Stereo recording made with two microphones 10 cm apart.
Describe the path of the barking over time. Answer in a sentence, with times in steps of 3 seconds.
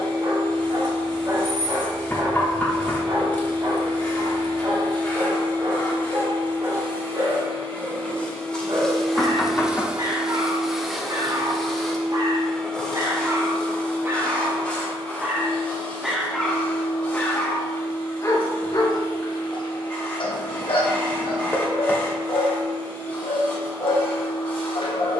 In this clip you hear the barking on the right from 0 s, in the centre from 15 s and on the left from 18 s.